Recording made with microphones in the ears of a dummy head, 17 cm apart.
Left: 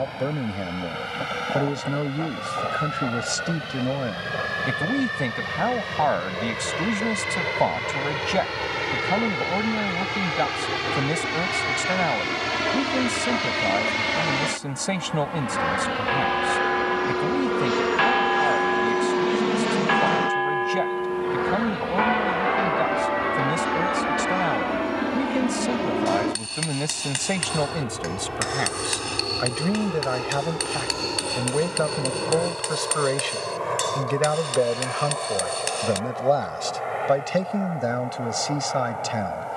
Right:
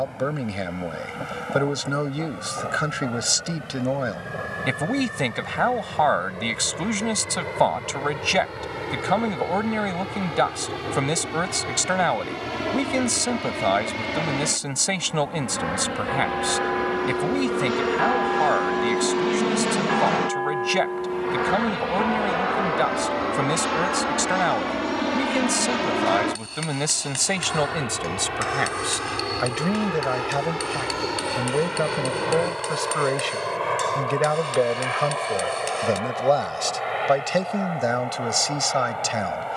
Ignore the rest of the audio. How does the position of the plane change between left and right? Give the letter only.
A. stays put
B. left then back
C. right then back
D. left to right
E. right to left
D.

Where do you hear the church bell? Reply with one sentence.
In this clip you hear the church bell on the left.